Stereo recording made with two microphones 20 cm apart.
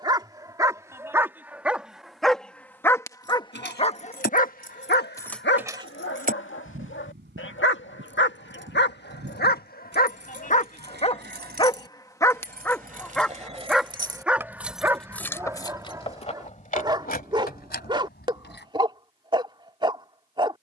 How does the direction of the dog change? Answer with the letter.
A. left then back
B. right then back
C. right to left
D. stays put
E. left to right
A.